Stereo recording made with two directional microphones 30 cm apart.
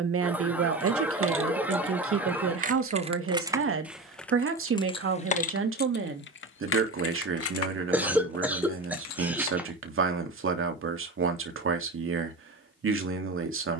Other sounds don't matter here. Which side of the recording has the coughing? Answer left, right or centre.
centre.